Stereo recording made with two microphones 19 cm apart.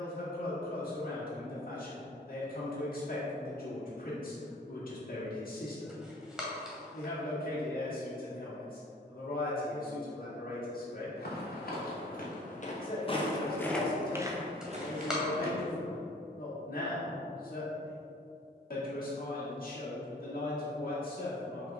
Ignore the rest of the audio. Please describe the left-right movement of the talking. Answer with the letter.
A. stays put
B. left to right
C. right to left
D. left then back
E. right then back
A.